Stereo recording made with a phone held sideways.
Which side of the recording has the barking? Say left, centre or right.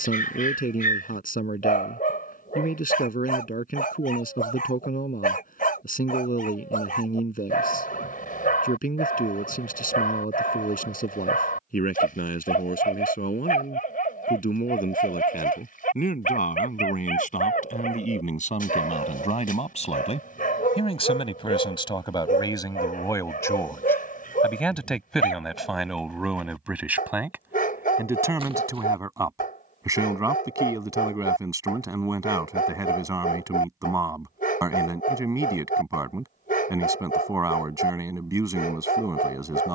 left.